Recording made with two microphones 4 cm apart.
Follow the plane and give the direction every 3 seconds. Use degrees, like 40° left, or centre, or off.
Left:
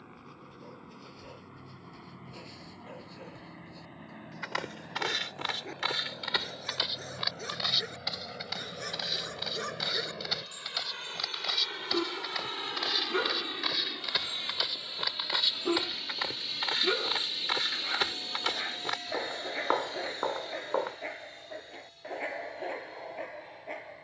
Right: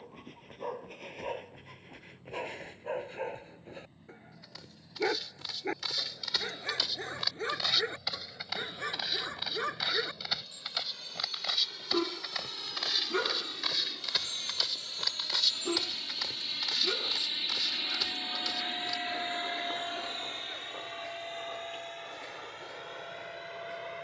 70° left, 60° left, 60° left, 50° left, 30° left, centre, 30° right, 60° right.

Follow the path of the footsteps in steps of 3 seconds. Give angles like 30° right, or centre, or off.
off, 60° left, 10° left, centre, 10° left, 30° left, 60° left, off.